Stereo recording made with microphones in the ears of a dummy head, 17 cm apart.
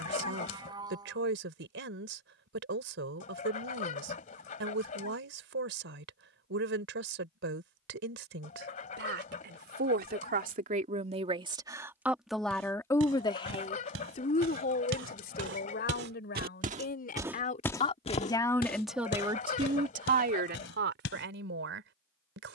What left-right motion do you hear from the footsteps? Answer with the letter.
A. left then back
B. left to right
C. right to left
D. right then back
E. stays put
C.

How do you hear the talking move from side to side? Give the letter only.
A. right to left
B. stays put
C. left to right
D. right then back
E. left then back
E.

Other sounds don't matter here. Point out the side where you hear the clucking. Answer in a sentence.
You can hear the clucking on the left.